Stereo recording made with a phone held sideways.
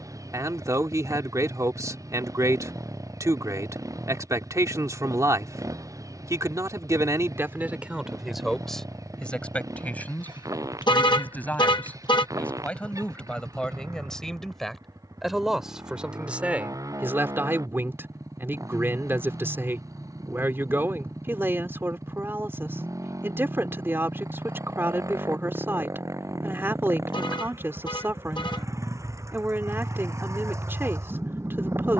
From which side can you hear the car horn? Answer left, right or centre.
left.